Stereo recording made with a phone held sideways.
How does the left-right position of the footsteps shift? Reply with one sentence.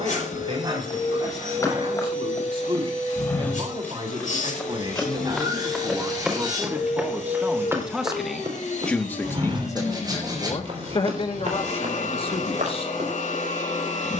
You can hear the footsteps go from the left side to the right.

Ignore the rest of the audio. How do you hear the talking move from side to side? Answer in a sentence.
In this clip you hear the talking move from right to left.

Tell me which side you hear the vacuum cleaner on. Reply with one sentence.
In this clip you hear the vacuum cleaner on the left.